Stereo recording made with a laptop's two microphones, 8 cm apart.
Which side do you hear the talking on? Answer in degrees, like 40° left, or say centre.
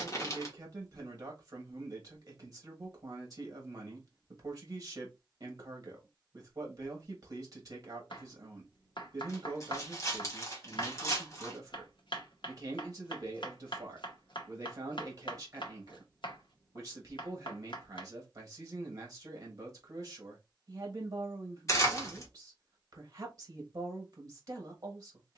40° right.